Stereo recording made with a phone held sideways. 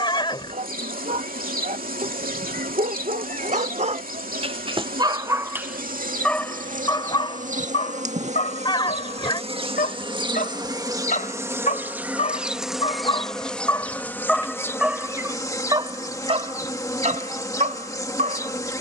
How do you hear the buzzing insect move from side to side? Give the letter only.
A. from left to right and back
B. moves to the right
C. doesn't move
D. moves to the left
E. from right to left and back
D.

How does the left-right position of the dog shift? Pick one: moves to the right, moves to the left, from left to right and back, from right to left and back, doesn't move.
from right to left and back.